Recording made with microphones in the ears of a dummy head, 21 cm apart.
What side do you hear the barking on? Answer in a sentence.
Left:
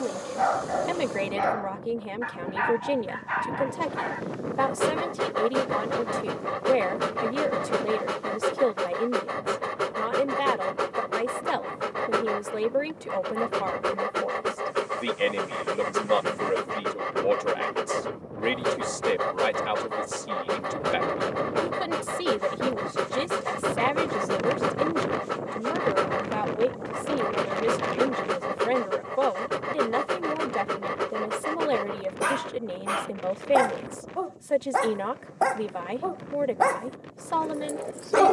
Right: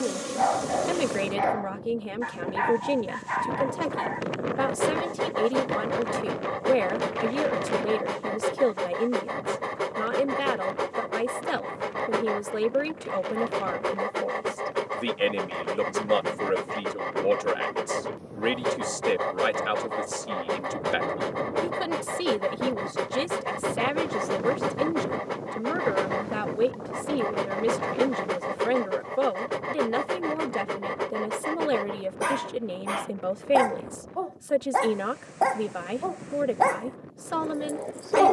You can hear the barking in the centre.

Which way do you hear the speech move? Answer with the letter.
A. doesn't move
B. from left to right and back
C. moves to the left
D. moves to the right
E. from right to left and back
A.